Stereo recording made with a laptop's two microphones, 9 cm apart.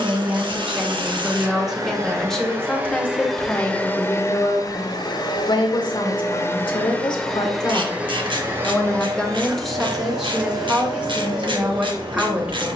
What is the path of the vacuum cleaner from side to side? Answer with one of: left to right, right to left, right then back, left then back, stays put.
left then back.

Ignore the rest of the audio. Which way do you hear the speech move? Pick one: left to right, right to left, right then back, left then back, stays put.
left then back.